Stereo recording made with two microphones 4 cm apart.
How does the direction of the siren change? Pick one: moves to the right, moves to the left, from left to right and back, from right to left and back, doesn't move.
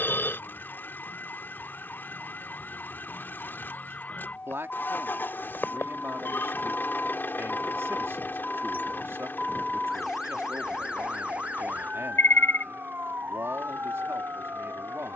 moves to the right.